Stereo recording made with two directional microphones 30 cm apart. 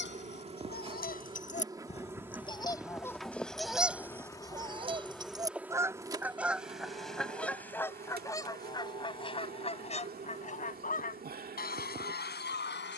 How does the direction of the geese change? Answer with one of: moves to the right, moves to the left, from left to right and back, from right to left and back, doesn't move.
from left to right and back.